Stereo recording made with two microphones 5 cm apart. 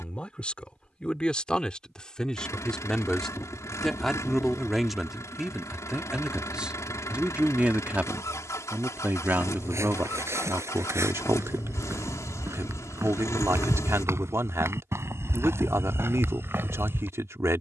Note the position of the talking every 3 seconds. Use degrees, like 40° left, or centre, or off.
20° left, centre, 20° right, 50° right, 60° right, 60° right.